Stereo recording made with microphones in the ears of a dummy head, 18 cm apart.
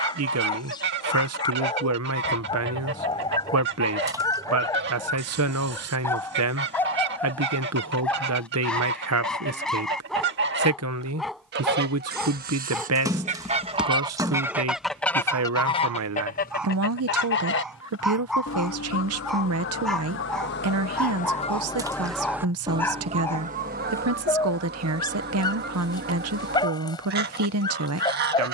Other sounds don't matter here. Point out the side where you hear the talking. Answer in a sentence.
You can hear the talking on the right.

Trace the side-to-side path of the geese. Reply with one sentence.
You can hear the geese go left and come back.